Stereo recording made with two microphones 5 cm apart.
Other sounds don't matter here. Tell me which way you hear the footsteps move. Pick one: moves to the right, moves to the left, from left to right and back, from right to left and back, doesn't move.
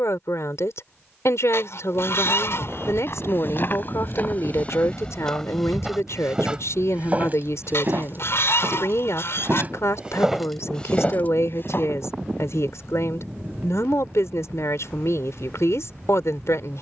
from left to right and back.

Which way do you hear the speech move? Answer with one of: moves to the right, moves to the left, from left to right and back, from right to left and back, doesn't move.
doesn't move.